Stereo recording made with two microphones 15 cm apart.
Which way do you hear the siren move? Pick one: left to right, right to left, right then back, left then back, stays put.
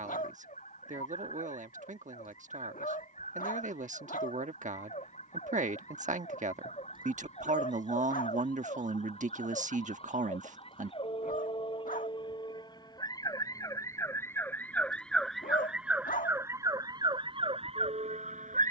left to right.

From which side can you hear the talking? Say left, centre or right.
right.